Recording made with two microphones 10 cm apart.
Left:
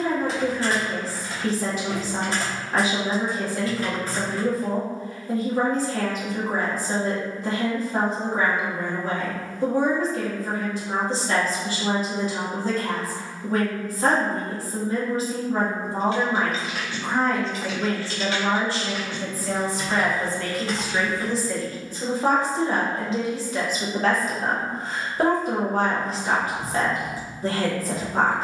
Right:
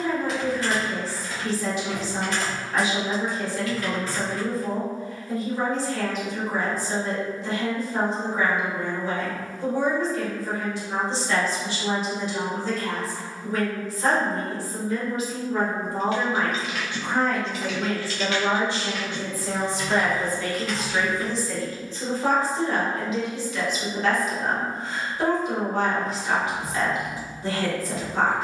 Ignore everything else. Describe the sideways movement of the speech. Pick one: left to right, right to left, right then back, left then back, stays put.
right then back.